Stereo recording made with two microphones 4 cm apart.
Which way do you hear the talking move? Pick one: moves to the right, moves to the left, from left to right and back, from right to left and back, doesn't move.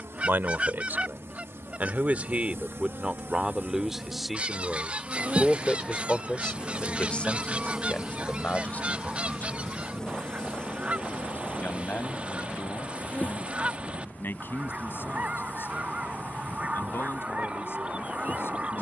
moves to the left.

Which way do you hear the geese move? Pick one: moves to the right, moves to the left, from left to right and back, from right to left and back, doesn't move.
doesn't move.